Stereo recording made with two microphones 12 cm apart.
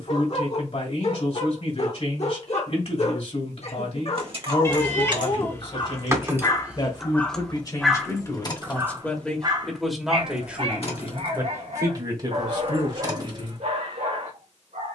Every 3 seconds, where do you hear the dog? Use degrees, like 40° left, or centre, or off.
70° left, 50° left, 10° left, 40° right, 60° right.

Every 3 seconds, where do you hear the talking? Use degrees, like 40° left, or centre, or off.
60° left, 50° left, 30° left, 10° right, 40° right.